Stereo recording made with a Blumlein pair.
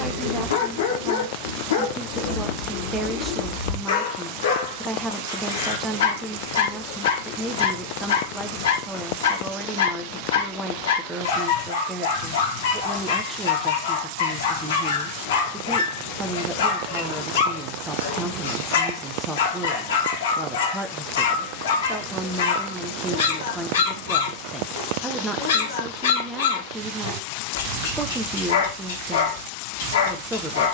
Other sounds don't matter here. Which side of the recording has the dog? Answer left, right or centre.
left.